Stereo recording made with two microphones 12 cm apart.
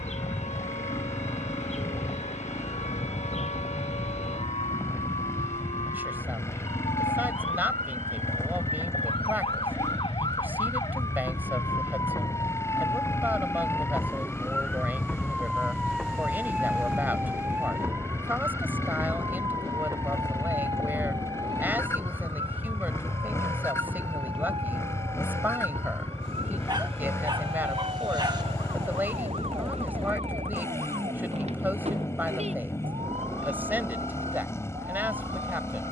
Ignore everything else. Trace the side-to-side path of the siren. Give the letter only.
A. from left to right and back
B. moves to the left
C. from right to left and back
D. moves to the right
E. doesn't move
D.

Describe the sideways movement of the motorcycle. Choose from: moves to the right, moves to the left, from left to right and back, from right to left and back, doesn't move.
doesn't move.